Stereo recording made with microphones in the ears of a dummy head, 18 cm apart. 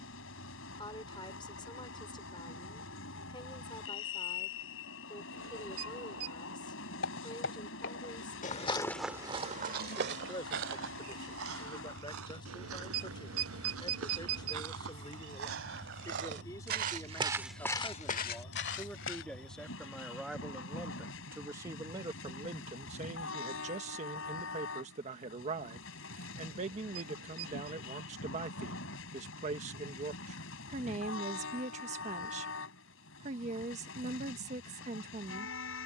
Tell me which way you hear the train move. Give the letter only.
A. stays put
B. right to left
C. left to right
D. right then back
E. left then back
A.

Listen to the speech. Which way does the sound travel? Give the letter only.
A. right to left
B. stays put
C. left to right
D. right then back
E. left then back
C.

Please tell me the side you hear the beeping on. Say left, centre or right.
right.